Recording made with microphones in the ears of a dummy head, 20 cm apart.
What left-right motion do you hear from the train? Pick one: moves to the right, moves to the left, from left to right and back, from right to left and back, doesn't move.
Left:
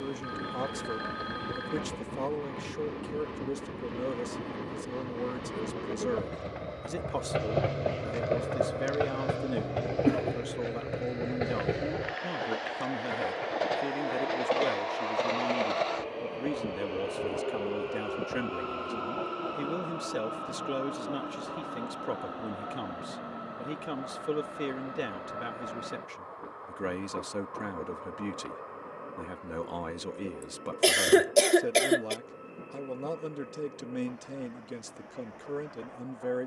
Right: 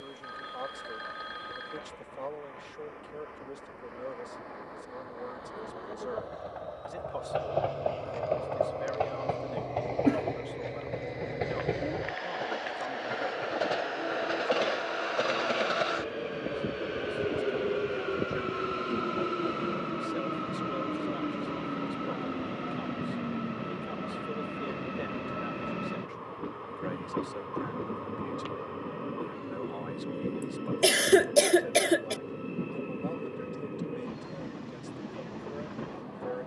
moves to the right.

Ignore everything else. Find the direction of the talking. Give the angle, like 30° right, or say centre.
60° left.